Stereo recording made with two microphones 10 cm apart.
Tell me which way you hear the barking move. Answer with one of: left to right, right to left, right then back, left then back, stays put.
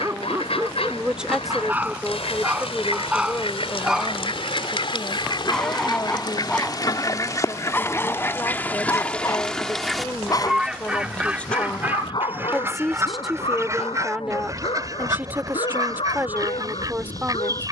right to left.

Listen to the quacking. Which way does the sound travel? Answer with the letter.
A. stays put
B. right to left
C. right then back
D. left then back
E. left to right
E.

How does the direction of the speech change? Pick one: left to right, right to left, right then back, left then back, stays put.
left then back.